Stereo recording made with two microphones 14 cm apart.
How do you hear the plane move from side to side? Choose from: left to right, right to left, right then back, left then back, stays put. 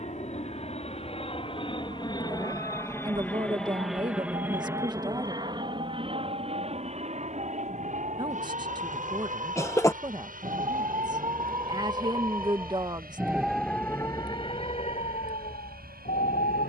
left to right.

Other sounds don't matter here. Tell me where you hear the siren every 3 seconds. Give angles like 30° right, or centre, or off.
60° right, 60° right, 60° right, 40° right, centre, 70° left.